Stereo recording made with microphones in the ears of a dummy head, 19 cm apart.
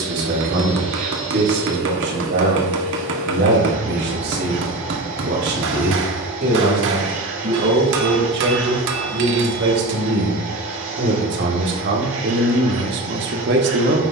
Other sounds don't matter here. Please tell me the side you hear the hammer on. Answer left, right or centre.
right.